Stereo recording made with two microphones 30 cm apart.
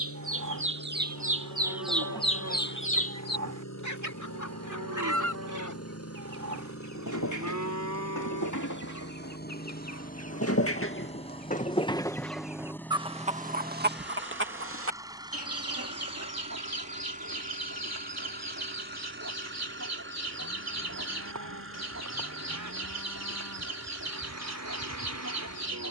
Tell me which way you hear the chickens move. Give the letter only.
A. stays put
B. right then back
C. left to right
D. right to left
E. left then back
E.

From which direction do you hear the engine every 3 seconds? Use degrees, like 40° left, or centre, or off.
70° left, 60° left, 40° left, 20° left, centre, 20° right, 40° right, 50° right, 50° right.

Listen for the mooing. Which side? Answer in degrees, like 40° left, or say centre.
70° right.